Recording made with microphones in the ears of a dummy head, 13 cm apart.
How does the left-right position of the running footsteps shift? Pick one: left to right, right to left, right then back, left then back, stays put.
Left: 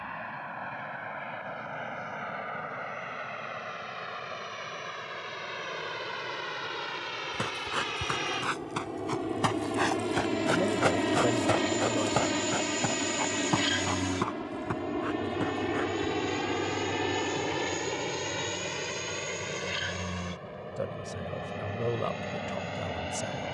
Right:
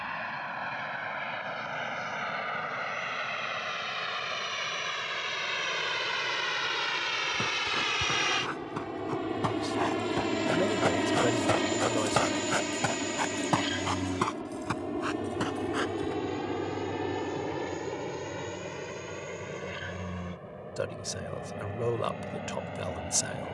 left to right.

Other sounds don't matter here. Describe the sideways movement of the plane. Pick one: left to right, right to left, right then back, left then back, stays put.
right to left.